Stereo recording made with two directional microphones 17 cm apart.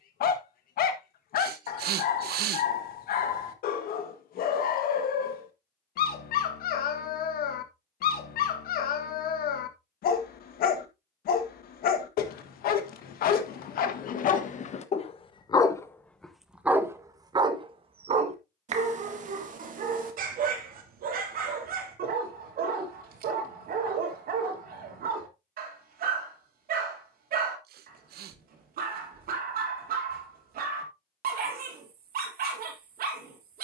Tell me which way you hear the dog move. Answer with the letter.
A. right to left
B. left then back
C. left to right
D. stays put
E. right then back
C.